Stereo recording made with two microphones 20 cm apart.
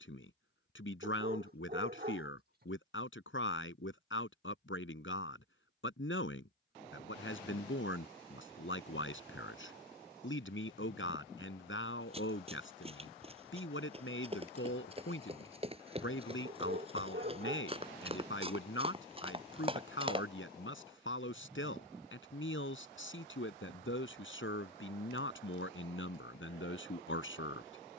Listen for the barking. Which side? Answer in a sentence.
You can hear the barking on the right.